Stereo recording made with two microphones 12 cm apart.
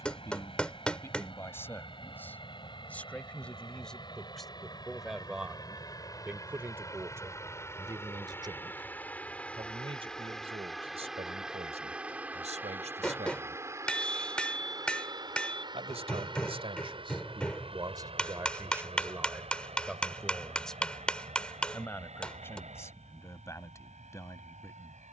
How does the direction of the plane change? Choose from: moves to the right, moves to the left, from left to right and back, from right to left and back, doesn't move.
moves to the right.